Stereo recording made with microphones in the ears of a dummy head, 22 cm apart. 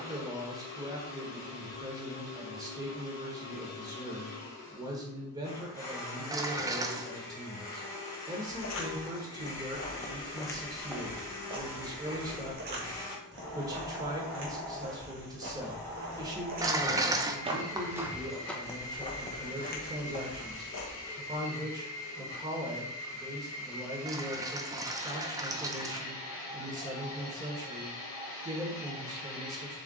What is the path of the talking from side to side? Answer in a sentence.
In this clip you hear the talking stay put.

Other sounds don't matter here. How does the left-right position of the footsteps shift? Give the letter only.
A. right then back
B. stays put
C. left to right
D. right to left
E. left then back
A.